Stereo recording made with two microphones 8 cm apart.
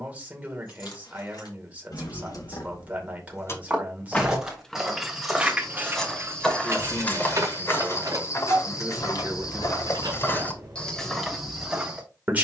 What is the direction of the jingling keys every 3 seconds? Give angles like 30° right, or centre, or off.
60° left, centre, 40° right, 60° right.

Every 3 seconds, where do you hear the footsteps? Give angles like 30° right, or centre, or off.
off, 10° right, 30° left, 20° left.